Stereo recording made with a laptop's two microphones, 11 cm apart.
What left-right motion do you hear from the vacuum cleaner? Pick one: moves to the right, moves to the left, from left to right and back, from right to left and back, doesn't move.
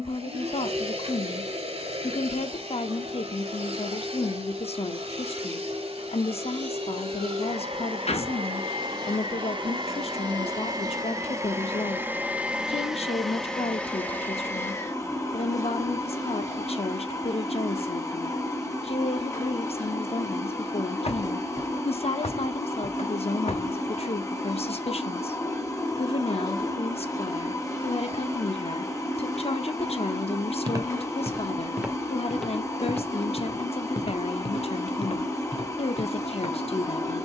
moves to the left.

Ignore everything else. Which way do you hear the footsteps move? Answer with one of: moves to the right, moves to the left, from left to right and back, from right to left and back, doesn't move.
moves to the left.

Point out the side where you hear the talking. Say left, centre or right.
left.